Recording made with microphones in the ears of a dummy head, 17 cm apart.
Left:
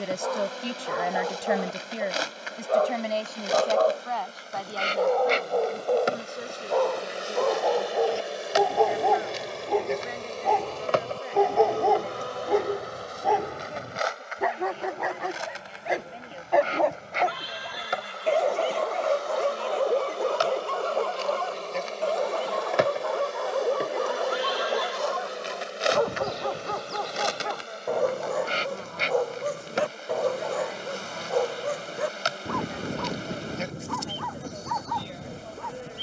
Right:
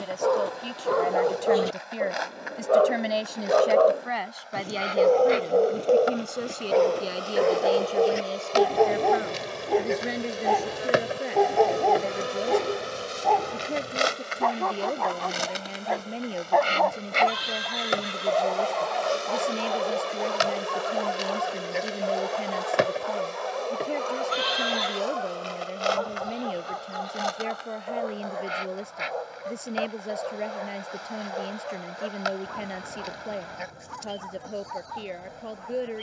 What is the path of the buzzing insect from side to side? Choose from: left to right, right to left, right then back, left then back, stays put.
right then back.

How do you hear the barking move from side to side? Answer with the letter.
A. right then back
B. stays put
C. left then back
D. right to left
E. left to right
D.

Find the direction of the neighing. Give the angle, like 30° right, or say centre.
60° right.